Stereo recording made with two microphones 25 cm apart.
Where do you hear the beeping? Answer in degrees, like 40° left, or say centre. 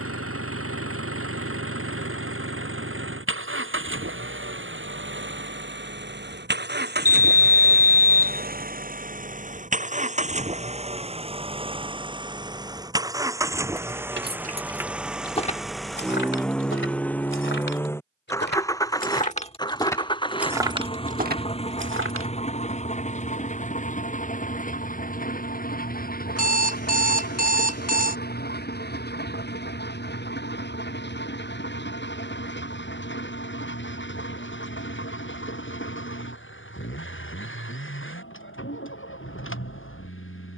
80° left.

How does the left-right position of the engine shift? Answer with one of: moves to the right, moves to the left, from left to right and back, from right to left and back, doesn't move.
moves to the left.